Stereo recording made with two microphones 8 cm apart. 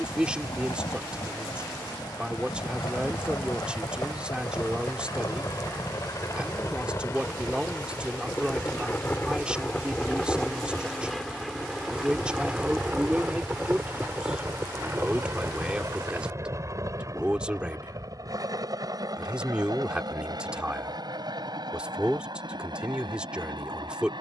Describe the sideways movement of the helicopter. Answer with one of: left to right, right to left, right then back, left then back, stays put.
left to right.